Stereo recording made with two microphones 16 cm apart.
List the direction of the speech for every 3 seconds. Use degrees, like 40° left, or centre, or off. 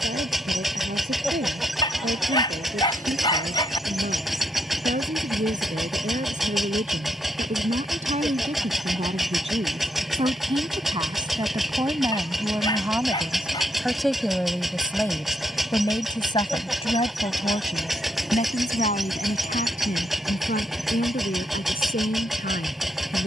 60° right, 60° right, 50° right, 30° right, 10° right, 30° left, 60° left, 70° left.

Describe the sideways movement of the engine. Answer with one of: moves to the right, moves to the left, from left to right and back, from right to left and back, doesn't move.
doesn't move.